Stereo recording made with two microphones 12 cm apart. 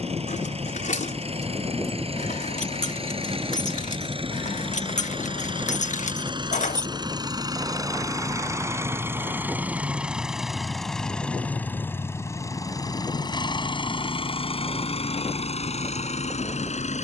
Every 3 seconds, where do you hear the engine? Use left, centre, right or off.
right, right, right, centre, left, left.